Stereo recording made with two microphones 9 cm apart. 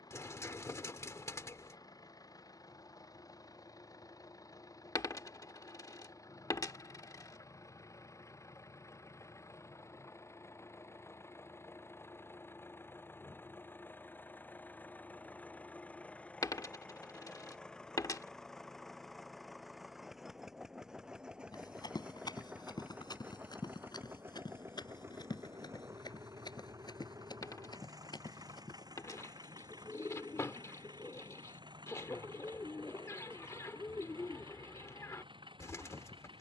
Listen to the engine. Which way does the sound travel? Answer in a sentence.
You can hear the engine go from the left side to the right.